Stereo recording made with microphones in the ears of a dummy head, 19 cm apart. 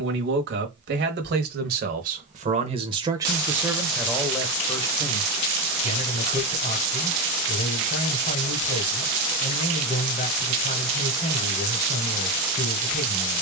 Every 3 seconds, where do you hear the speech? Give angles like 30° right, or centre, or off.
50° right, 10° left, 40° left, 40° left, 40° left.